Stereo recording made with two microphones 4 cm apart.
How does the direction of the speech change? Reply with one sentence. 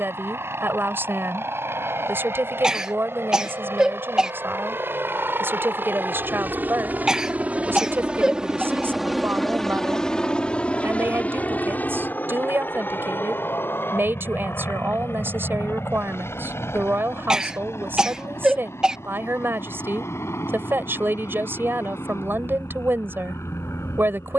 You can hear the speech stay in one place.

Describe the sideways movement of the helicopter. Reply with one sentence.
In this clip you hear the helicopter travel towards the left.